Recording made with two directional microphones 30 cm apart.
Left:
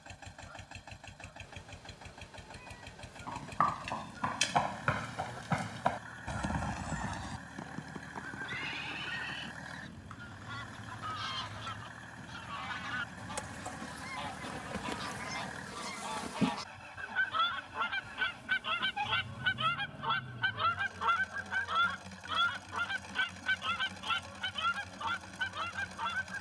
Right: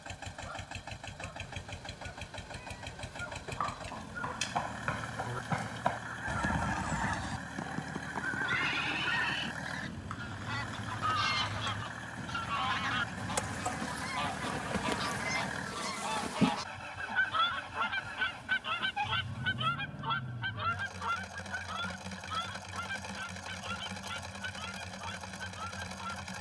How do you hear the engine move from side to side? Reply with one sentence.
You can hear the engine stay put.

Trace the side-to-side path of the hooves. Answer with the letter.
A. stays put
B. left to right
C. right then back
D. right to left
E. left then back
B.